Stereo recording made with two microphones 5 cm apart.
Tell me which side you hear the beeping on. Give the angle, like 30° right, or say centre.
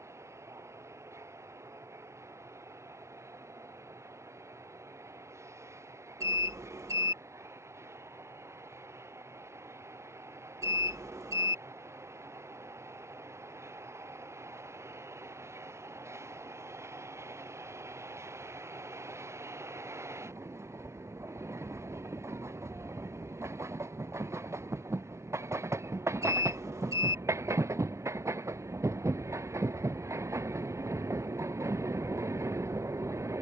80° right.